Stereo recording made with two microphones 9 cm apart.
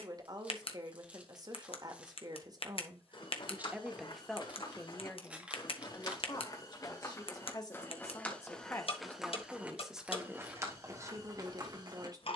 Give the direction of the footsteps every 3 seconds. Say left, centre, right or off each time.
off, left, left, right.